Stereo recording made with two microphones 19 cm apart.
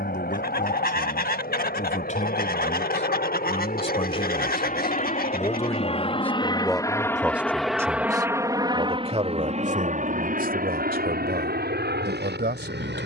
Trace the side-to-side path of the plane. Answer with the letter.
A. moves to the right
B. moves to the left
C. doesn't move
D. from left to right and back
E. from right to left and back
A.